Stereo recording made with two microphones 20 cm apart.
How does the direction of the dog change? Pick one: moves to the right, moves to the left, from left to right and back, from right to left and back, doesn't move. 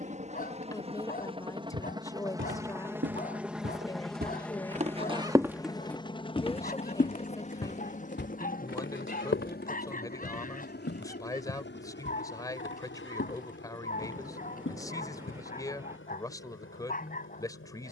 doesn't move.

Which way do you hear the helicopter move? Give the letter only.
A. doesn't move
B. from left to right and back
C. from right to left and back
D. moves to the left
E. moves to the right
D.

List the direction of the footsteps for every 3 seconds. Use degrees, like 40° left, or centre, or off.
70° right, 40° right, 50° left, 70° left, 80° left, off.